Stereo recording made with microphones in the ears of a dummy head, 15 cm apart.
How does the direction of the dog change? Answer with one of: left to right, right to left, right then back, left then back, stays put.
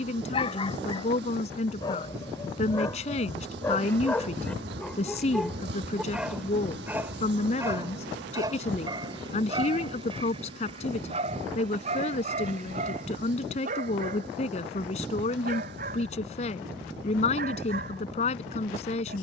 left to right.